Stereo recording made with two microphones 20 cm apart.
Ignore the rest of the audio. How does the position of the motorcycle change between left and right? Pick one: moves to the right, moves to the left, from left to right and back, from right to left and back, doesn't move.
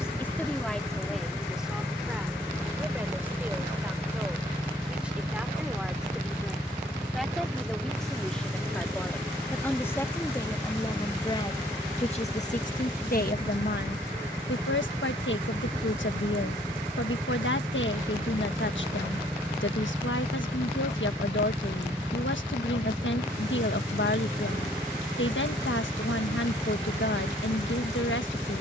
doesn't move.